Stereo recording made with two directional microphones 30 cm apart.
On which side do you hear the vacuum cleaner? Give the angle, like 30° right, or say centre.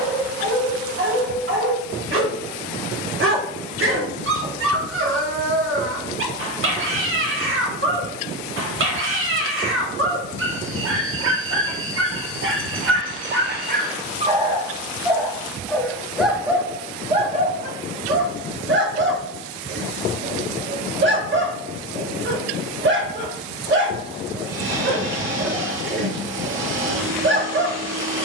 40° right.